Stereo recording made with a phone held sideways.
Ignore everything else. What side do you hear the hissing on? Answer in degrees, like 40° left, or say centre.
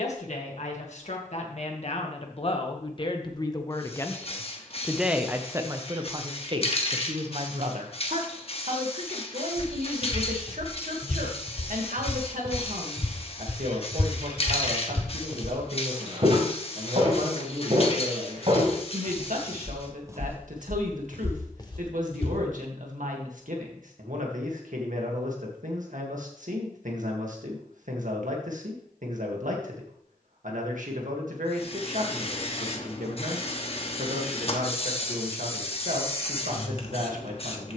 50° left.